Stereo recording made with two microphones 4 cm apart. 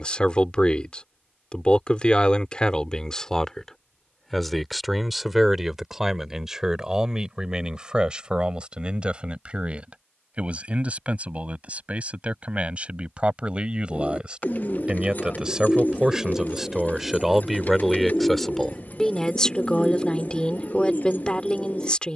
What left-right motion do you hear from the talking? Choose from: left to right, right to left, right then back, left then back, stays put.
right then back.